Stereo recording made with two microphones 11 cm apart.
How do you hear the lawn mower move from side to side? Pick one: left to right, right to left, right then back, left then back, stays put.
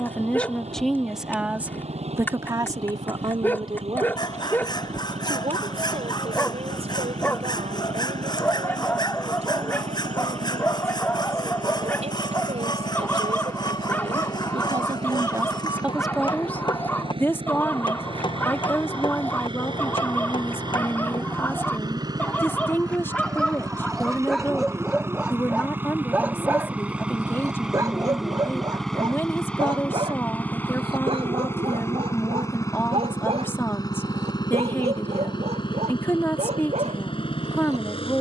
right to left.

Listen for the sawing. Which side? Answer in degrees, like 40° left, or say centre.
40° left.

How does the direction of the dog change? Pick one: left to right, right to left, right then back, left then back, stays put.
left to right.